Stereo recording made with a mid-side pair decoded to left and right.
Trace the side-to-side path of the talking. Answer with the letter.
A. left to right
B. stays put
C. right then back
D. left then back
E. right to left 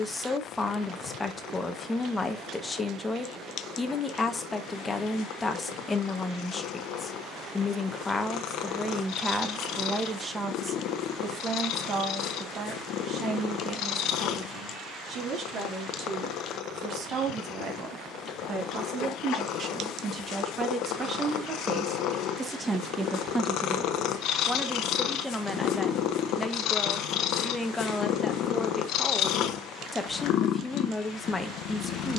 C.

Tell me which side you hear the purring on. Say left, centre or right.
left.